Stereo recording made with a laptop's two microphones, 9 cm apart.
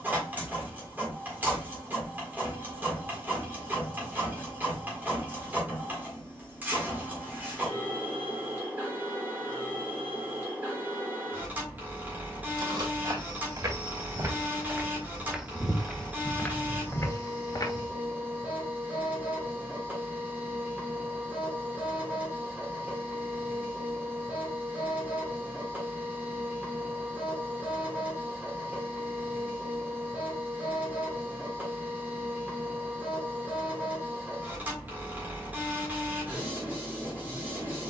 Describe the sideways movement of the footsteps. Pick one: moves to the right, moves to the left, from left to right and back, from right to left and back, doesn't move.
moves to the left.